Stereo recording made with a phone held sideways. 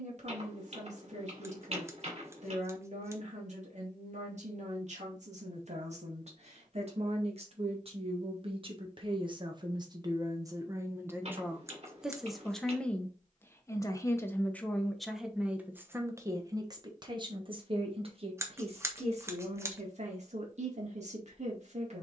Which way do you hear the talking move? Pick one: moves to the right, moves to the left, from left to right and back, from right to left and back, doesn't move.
from right to left and back.